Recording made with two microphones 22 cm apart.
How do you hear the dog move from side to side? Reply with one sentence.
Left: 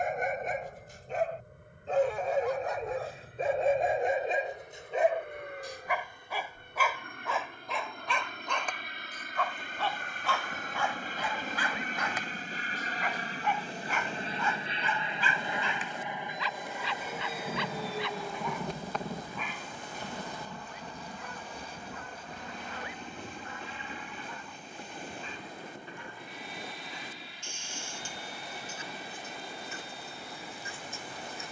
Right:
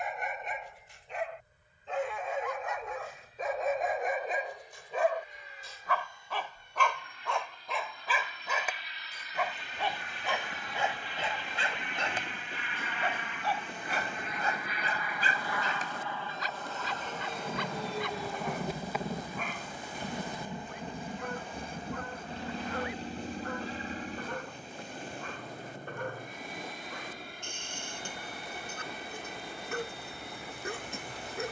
You can hear the dog move to the right.